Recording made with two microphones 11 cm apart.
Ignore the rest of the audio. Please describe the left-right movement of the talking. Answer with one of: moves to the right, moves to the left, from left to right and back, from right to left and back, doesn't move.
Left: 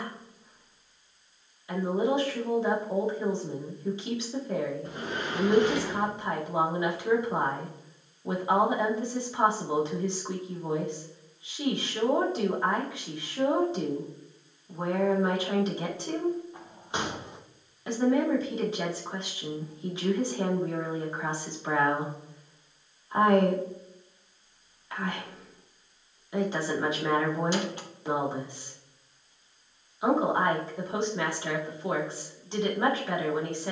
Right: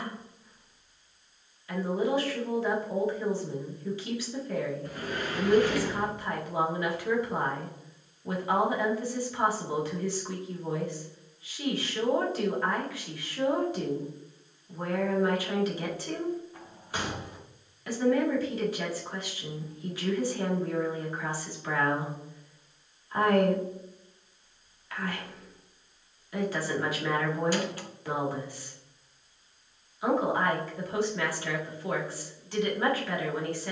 doesn't move.